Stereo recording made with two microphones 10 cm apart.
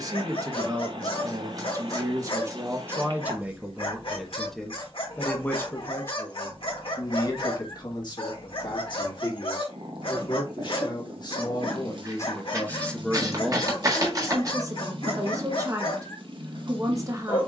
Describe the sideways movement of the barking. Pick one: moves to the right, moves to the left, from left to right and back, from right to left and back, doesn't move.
doesn't move.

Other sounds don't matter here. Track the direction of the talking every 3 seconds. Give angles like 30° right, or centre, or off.
30° right, centre, 40° left, 50° left, centre, 30° right.